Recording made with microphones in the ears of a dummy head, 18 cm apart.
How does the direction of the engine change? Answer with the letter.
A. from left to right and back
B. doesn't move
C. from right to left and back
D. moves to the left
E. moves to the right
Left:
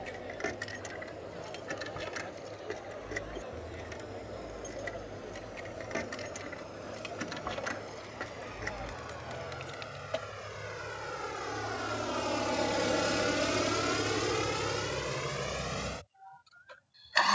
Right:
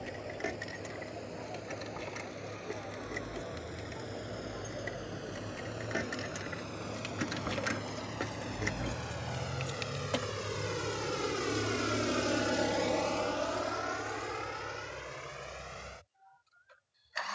D.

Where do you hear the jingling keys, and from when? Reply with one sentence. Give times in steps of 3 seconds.
You can hear the jingling keys in the centre from 0 s, on the right from 6 s and not at all from 12 s.